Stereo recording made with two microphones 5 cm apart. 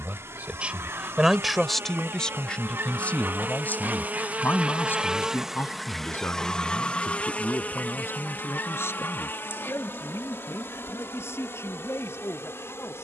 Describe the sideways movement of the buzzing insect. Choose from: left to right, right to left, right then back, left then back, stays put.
right to left.